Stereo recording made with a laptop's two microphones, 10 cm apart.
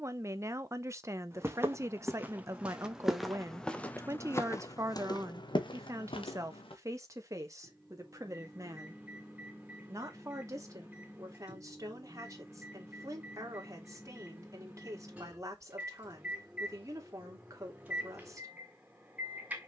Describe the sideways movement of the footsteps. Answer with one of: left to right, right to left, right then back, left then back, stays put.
right to left.